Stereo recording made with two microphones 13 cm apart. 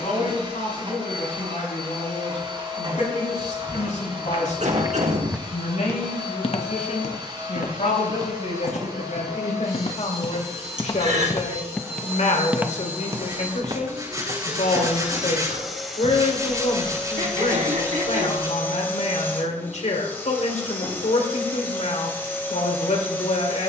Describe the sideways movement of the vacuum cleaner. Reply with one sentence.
In this clip you hear the vacuum cleaner move from right to left.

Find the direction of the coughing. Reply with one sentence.
In this clip you hear the coughing on the right.